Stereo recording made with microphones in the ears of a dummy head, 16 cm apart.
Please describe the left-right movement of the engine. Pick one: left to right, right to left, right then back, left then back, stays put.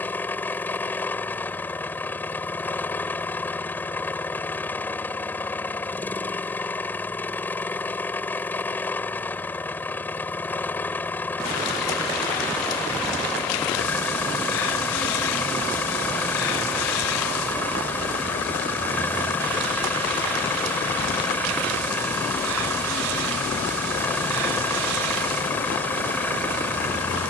stays put.